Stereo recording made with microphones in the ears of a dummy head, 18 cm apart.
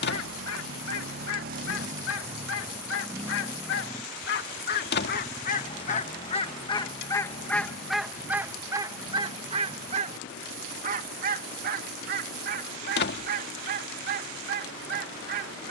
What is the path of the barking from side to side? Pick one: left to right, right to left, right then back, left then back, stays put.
left to right.